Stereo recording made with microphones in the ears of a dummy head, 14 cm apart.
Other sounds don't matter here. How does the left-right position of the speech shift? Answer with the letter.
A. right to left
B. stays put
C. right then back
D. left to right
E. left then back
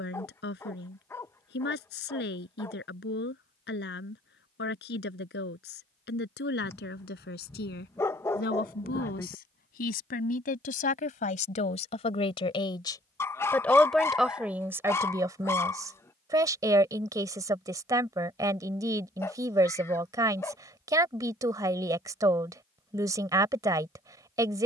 D.